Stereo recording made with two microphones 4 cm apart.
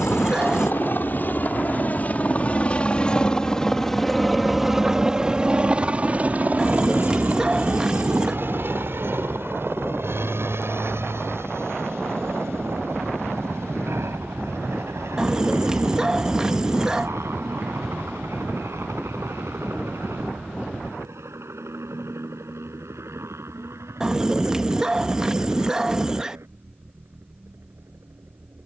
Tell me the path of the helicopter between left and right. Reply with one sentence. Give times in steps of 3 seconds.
You can hear the helicopter on the left from 0 s, in the centre from 3 s and on the right from 6 s.